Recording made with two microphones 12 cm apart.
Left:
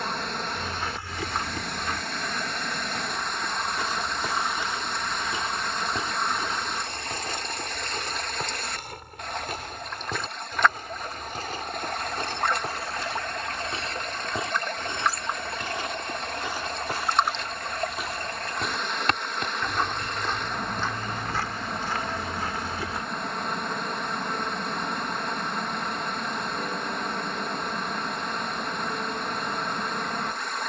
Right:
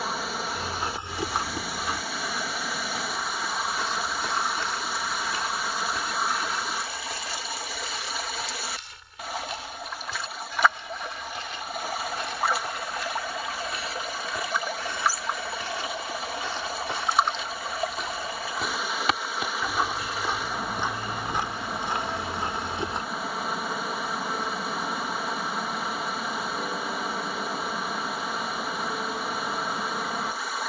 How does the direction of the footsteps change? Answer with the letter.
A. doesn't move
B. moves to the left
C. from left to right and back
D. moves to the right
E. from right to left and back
E.